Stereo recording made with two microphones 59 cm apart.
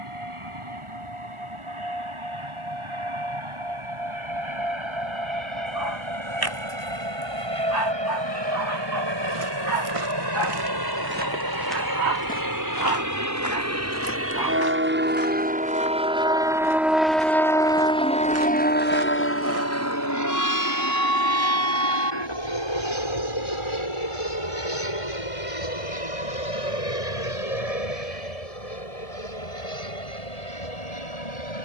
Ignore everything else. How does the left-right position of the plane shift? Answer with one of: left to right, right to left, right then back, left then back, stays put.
right to left.